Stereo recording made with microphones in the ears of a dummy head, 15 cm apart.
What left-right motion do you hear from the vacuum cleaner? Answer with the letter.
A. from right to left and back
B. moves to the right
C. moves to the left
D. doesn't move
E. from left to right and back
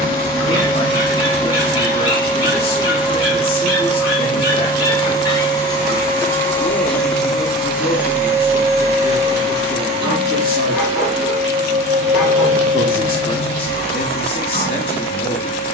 B.